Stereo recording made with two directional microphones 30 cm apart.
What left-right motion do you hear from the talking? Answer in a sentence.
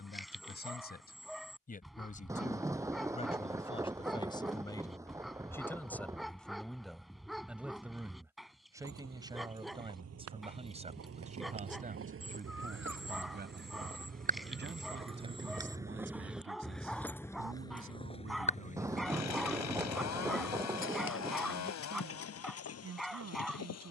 You can hear the talking travel towards the right.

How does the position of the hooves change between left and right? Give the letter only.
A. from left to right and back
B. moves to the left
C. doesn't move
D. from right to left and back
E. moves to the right
B.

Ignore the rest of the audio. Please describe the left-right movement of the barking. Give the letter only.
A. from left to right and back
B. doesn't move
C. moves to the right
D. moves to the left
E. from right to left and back
B.